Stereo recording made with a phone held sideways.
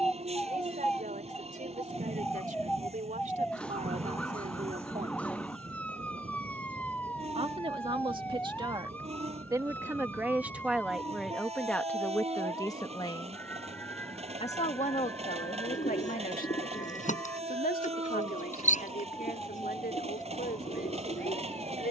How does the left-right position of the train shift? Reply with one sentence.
In this clip you hear the train stay in one place.